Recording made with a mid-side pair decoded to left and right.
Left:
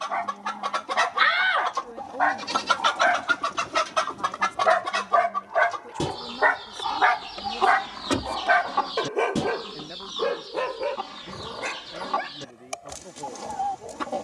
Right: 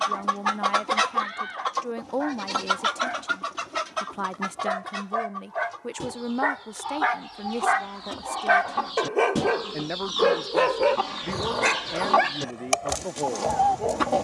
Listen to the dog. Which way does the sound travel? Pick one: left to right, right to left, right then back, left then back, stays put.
left to right.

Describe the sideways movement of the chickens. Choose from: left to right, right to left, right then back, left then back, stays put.
left then back.